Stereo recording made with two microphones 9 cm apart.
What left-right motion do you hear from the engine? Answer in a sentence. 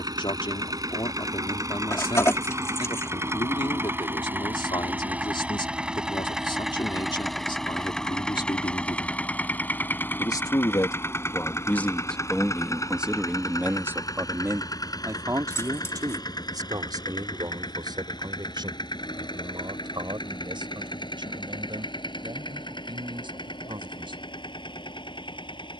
In this clip you hear the engine move from right to left.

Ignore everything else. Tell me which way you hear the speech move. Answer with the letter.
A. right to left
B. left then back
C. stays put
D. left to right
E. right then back
D.